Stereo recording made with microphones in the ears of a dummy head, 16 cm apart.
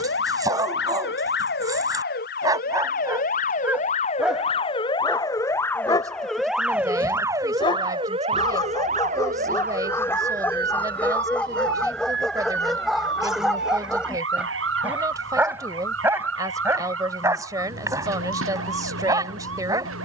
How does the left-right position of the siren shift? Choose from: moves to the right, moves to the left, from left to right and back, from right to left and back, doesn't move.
moves to the right.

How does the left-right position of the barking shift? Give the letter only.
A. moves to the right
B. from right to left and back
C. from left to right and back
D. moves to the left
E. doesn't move
B.